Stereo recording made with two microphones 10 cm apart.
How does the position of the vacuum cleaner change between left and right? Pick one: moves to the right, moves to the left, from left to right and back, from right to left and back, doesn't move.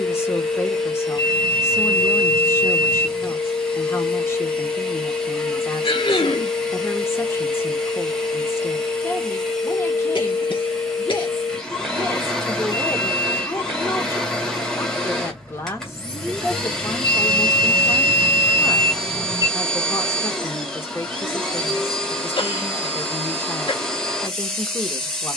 doesn't move.